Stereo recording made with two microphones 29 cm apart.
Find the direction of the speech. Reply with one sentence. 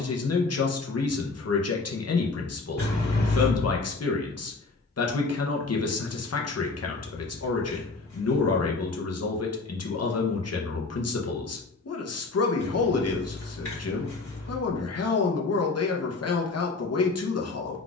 In this clip you hear the speech on the left.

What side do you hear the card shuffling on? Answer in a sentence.
In this clip you hear the card shuffling on the left.